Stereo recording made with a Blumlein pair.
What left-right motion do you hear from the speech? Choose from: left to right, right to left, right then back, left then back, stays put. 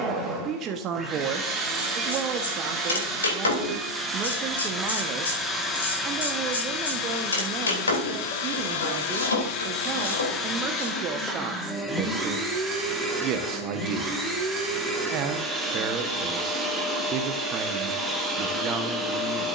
stays put.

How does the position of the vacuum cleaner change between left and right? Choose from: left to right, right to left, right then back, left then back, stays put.
left then back.